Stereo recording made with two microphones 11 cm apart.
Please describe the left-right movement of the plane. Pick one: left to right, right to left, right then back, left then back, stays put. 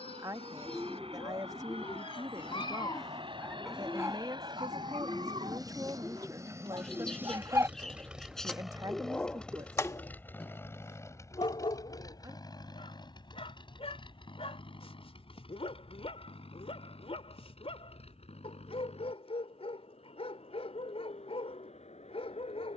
right to left.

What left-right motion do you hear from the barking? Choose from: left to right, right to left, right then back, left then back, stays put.
right then back.